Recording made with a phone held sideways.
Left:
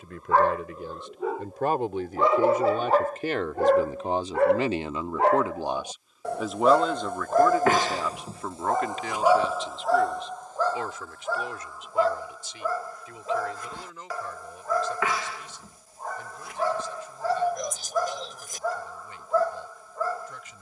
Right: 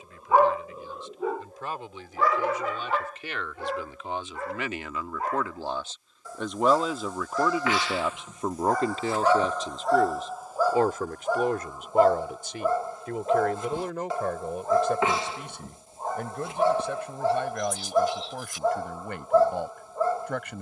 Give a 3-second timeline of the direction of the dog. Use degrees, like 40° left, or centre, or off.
10° left, 70° left, 50° left, 10° right, 20° right, 20° right, 20° right.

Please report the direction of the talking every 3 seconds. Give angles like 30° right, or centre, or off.
60° left, 30° left, 10° right, 50° right, 60° right, 70° right, 70° right.